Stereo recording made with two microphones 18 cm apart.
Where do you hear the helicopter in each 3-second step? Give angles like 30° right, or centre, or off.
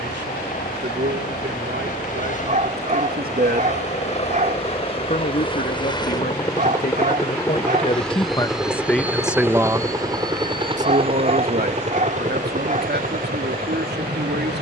50° left, 30° left, 10° left, 20° right, 50° right.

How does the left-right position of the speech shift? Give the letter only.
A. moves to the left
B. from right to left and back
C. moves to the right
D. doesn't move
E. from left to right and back
B.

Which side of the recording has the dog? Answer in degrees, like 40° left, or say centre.
50° right.